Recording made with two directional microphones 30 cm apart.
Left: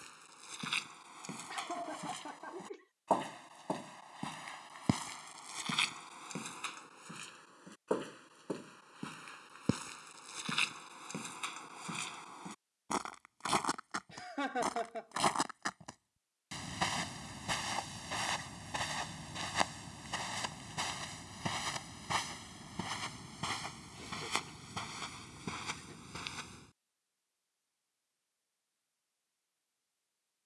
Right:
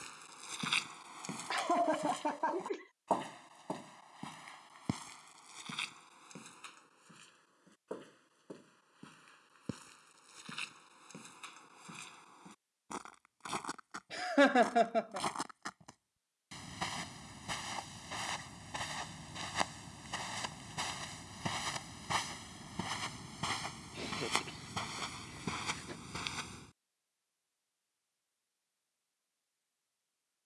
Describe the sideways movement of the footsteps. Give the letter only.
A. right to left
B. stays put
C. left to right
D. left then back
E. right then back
D.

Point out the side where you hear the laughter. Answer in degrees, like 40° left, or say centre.
60° right.